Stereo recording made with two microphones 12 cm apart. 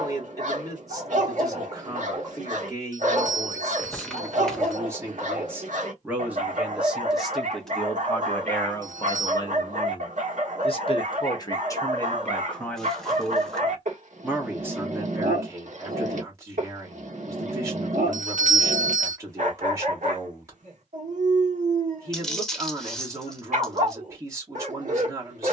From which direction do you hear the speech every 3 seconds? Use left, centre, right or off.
right, right, centre, left, centre, right, right, right, right.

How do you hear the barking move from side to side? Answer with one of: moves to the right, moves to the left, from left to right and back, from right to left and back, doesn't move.
doesn't move.